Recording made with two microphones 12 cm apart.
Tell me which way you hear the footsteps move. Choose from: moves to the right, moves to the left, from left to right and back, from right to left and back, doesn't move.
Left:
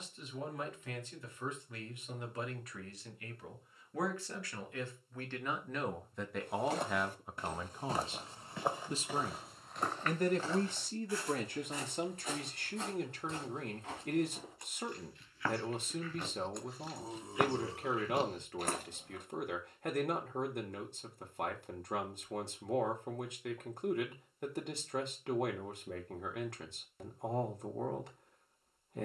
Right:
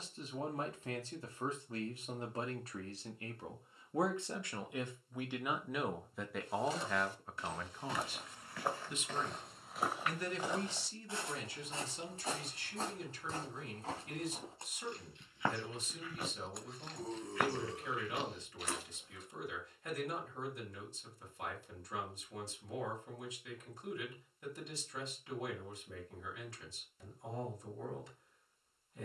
from left to right and back.